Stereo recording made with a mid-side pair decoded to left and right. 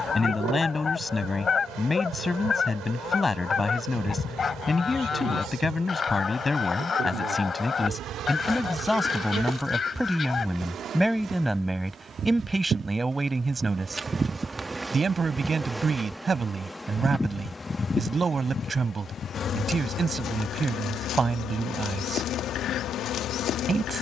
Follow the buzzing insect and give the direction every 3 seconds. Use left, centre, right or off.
right, right, right, right, right, centre, left, left.